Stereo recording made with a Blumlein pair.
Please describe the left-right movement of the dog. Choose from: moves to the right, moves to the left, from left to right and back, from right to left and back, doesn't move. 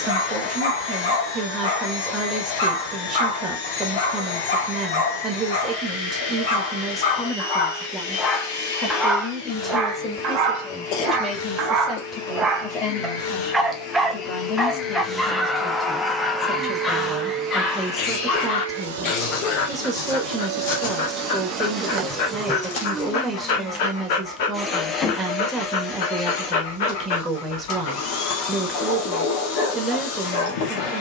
from left to right and back.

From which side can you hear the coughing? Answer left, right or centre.
left.